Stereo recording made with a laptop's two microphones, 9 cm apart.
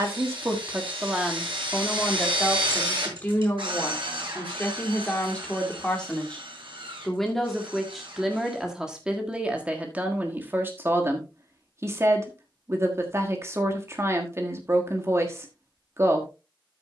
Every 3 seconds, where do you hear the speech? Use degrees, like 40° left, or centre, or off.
10° right, 20° left, centre, 20° right, 30° right, 30° right.